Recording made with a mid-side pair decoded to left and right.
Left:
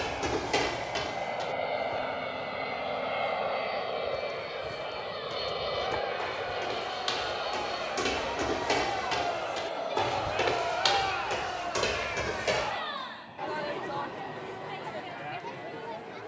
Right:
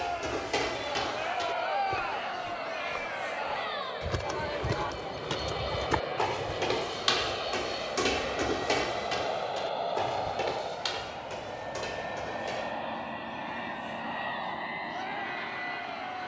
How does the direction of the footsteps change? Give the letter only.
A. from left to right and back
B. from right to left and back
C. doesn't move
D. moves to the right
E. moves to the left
A.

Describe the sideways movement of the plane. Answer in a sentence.
In this clip you hear the plane go from the left side to the right.